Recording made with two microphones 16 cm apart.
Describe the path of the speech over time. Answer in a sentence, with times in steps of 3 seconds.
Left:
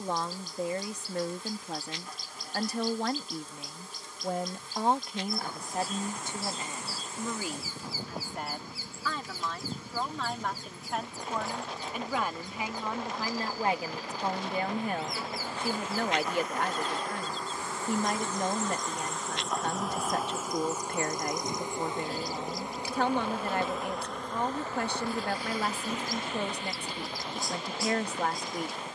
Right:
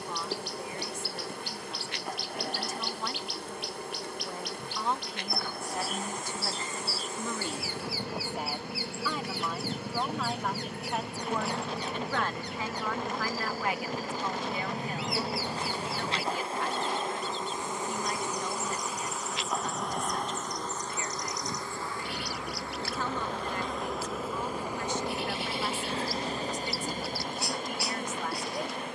You can hear the speech on the left from 0 s, in the centre from 6 s and on the left from 12 s.